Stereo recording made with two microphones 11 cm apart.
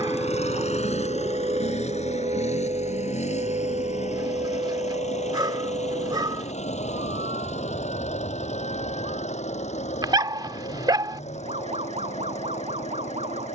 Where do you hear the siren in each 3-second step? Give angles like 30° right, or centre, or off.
40° right, 60° right, 70° right, 70° right, 70° right.